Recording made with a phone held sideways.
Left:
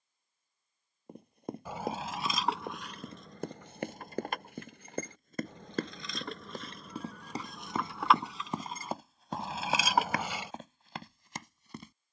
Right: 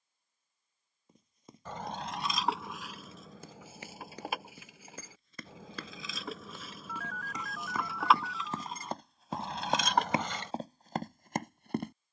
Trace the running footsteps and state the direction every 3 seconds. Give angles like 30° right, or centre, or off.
60° left, 50° left, 30° left, 30° right.